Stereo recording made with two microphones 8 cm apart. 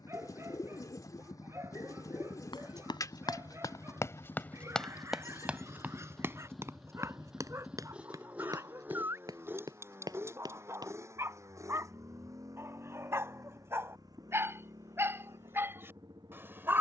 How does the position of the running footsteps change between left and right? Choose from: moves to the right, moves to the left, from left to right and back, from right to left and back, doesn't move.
moves to the right.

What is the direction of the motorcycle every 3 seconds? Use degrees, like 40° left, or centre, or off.
50° left, 20° left, 10° right, 30° right, 50° right, 50° right.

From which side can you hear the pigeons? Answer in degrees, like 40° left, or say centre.
50° left.